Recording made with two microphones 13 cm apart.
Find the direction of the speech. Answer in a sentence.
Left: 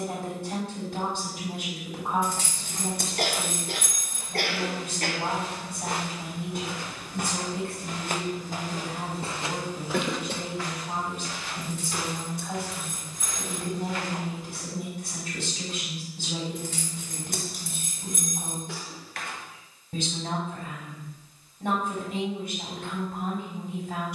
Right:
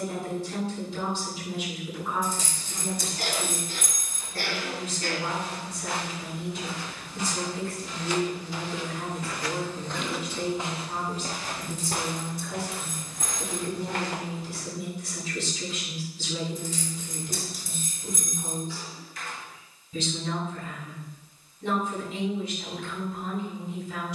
In this clip you hear the speech on the left.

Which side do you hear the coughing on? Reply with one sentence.
In this clip you hear the coughing on the left.